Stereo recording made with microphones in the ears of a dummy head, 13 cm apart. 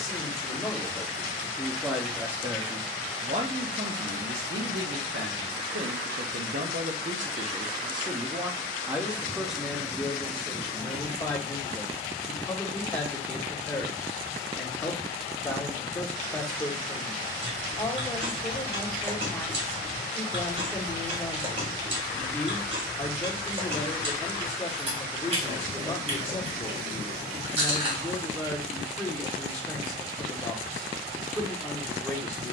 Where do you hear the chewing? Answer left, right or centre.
right.